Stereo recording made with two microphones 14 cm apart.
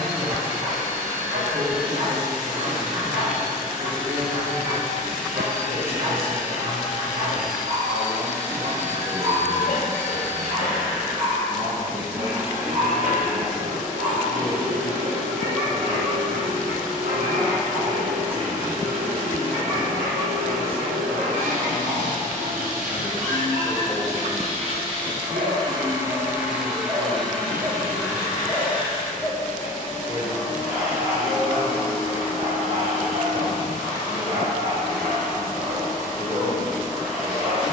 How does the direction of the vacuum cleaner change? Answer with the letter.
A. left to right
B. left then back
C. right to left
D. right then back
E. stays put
C.